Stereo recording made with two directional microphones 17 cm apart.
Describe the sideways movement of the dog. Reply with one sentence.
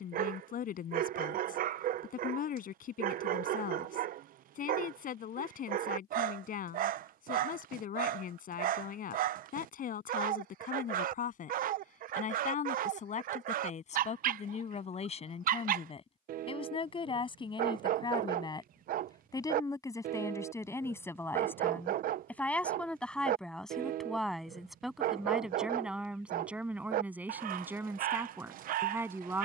In this clip you hear the dog stay put.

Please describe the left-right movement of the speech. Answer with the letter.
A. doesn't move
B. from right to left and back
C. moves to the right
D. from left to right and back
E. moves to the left
C.